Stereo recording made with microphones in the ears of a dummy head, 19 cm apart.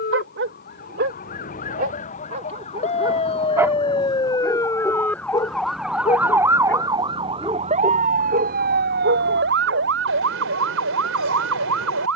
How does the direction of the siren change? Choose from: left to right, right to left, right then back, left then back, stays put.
left to right.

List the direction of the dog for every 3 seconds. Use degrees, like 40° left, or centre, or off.
40° right, centre, 10° right, 60° right.